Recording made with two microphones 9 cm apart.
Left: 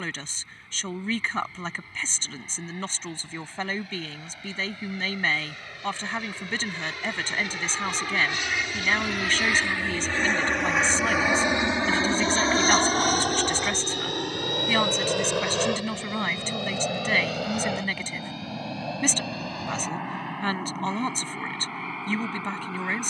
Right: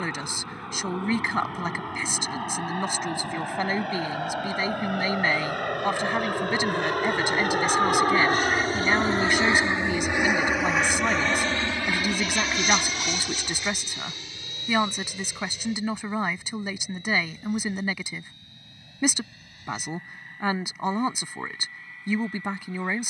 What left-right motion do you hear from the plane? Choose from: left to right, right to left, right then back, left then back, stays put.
right to left.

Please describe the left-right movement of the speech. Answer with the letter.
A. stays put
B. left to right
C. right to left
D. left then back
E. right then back
A.